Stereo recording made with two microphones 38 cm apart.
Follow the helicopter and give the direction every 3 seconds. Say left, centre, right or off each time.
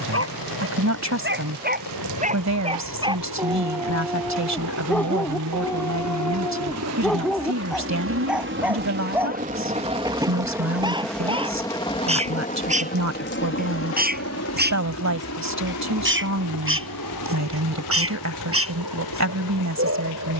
right, right, right, centre, left, left, left.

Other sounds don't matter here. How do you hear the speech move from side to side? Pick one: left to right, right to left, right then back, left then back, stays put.
stays put.